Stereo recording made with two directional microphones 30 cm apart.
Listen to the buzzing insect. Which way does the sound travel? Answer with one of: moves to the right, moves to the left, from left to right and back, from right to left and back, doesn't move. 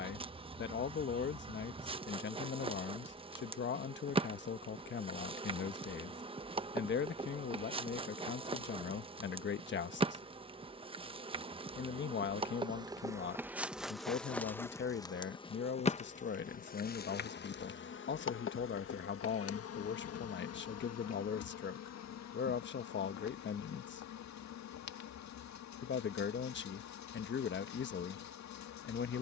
moves to the left.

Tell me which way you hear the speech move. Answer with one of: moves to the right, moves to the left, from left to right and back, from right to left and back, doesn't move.
doesn't move.